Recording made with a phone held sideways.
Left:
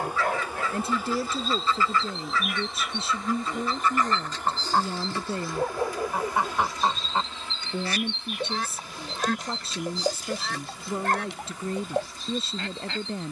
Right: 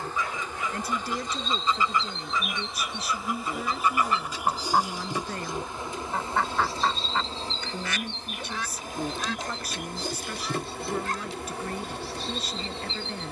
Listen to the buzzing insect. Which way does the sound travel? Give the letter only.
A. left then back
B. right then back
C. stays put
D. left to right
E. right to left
D.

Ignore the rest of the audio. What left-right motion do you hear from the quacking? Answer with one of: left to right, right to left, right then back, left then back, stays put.
right to left.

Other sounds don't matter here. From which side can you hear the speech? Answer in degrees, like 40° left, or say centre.
30° left.